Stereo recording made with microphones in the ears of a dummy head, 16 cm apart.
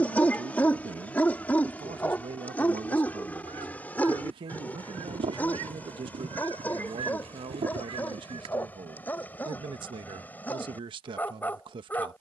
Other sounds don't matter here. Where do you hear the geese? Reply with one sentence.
In this clip you hear the geese on the right.